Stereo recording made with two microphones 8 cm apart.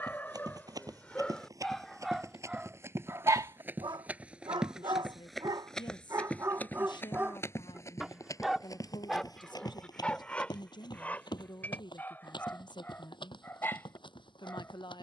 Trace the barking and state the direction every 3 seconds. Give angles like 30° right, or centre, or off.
10° left, 50° right, 20° right, 10° left, 20° left.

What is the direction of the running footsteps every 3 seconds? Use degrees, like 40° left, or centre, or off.
40° right, 10° right, 30° left, 60° left, 70° left.